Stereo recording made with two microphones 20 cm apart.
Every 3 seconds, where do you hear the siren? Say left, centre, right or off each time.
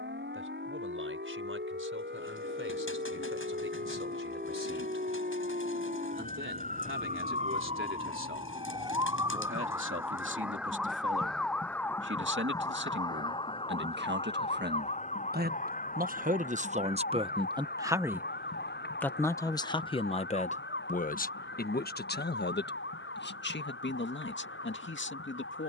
right, right, right, centre, left, left, left, left, left.